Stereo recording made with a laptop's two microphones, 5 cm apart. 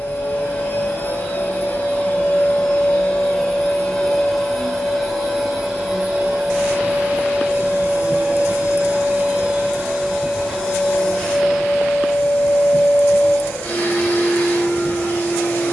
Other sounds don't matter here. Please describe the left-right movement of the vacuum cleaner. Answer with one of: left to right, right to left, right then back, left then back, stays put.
right then back.